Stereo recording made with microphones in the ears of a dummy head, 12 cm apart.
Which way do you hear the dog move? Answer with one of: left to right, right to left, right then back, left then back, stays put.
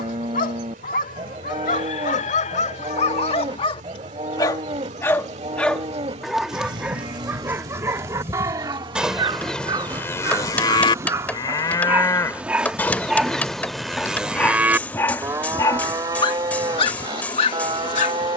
right then back.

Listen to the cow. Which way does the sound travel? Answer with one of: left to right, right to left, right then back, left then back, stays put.
left then back.